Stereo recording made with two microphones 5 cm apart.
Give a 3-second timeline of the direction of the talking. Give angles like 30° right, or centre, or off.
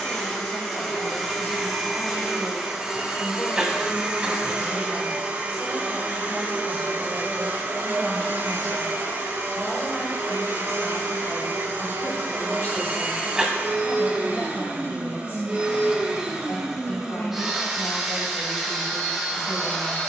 60° left, 20° left, centre, 20° left, 40° left, 50° left, 50° left.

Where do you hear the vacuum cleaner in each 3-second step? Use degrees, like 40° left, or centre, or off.
centre, 20° right, 50° right, 60° right, 40° right, 10° right, 10° left.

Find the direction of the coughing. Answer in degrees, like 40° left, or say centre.
10° right.